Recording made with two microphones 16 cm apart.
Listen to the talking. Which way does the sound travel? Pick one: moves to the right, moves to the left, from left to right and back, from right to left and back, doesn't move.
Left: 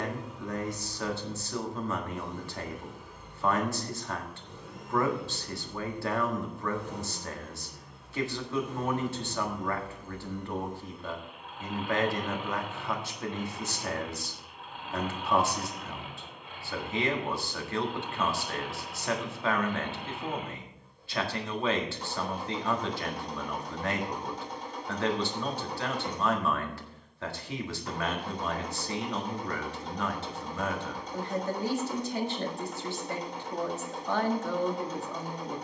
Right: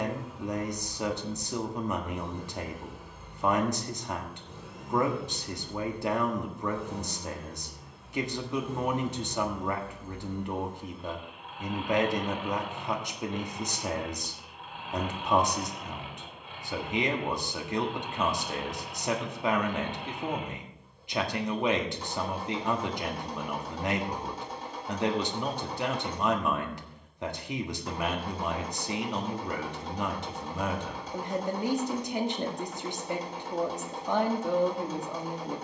doesn't move.